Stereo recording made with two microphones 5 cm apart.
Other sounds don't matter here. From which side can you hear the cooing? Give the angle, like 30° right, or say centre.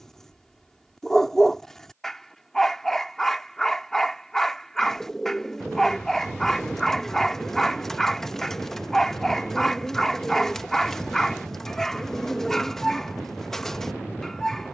10° left.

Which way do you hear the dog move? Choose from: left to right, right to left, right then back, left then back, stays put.
stays put.